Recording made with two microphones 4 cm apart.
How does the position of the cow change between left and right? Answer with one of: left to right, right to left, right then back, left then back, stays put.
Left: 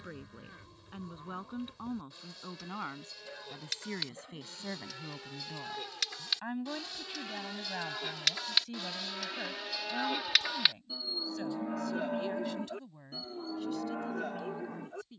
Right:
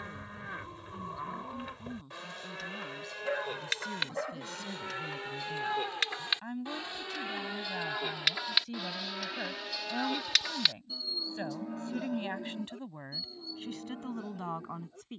right to left.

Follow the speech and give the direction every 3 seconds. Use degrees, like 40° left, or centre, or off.
40° left, 30° left, centre, 20° right, 50° right.